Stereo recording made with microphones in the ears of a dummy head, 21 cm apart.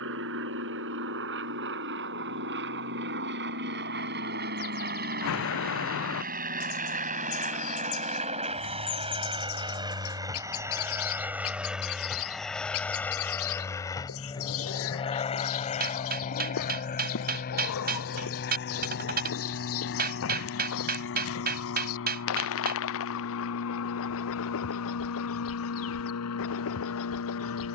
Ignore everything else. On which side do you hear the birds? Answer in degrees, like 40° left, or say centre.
60° left.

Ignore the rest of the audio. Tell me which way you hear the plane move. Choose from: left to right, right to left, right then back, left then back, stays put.
right to left.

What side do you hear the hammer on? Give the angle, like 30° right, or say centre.
40° right.